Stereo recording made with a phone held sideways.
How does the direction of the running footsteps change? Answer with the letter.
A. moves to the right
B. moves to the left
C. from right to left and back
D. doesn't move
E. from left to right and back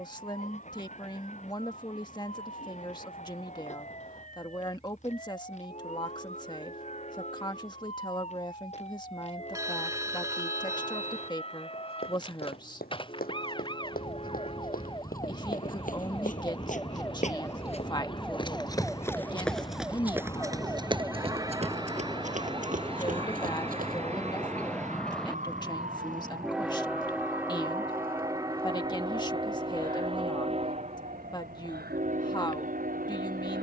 A.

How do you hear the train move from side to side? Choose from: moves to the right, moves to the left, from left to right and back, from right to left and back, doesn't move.
moves to the right.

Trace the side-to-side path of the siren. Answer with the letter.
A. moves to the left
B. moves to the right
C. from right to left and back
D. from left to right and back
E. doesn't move
B.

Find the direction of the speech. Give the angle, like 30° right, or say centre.
30° left.